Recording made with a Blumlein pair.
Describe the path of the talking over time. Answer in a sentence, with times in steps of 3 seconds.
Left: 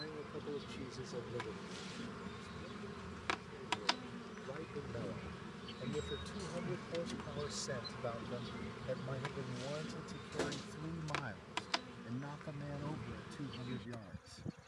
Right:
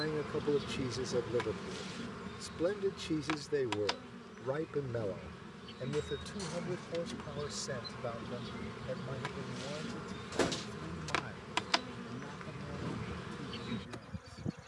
You can hear the talking on the right from 0 s and in the centre from 6 s.